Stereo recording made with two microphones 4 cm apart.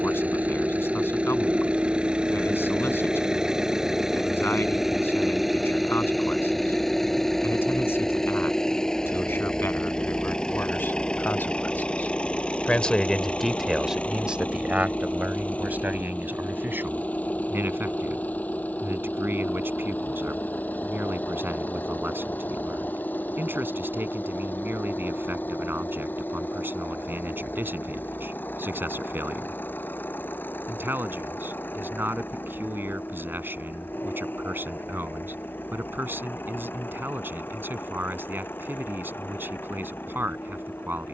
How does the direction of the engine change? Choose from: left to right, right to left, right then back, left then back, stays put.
right to left.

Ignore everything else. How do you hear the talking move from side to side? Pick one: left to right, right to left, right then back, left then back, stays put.
left to right.